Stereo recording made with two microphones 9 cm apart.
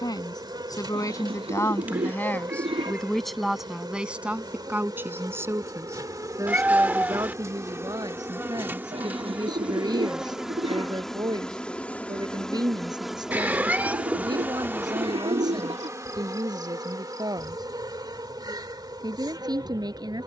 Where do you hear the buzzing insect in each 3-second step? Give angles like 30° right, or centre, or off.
50° right, 50° right, 30° right, centre, 10° right, 40° right, 50° right.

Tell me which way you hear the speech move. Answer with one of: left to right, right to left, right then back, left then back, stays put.
left to right.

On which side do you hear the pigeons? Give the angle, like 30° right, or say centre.
80° right.